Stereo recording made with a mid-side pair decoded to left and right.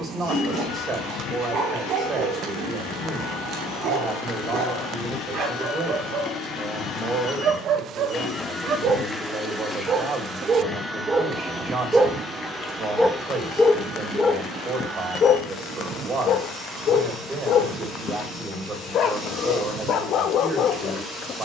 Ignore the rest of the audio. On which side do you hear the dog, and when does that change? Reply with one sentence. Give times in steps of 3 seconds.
In this clip you hear the dog on the right from 0 s, in the centre from 12 s and on the left from 15 s.